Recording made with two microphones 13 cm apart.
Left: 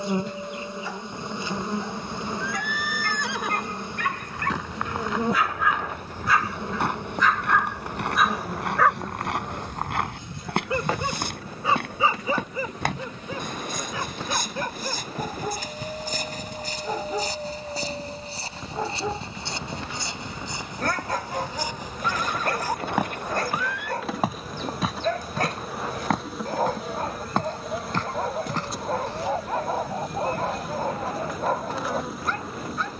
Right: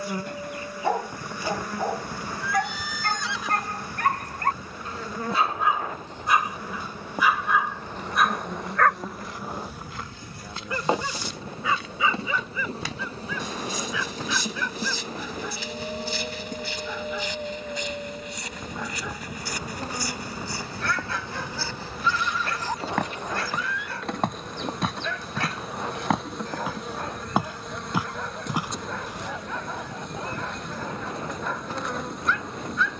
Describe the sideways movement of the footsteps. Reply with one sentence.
In this clip you hear the footsteps move from left to right.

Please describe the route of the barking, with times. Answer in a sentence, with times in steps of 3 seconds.
You can hear the barking on the right from 0 s, in the centre from 6 s and on the left from 9 s.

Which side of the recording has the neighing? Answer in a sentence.
You can hear the neighing on the left.